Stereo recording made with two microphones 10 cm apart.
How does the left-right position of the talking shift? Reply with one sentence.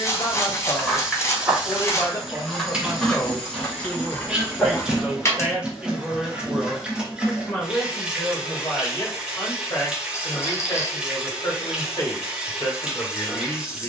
In this clip you hear the talking move from left to right and back again.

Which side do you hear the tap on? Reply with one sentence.
You can hear the tap in the centre.